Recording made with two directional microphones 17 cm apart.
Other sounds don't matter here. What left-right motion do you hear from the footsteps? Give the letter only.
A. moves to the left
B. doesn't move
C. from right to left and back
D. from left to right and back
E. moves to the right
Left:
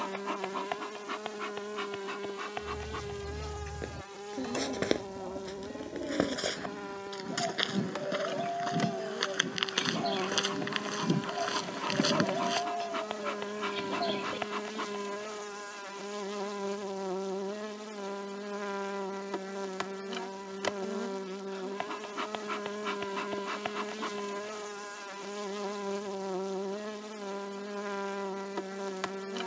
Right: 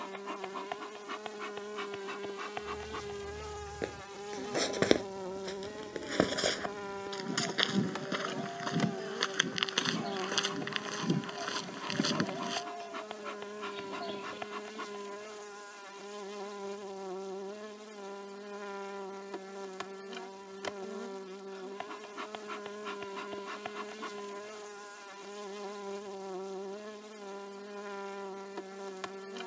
A.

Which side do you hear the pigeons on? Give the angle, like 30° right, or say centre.
50° left.